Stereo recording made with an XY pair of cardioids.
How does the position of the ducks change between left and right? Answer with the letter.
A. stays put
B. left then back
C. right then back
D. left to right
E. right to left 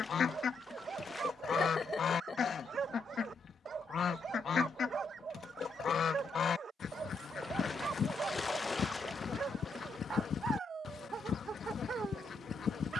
A.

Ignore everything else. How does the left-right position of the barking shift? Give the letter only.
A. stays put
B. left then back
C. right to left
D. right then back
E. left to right
A.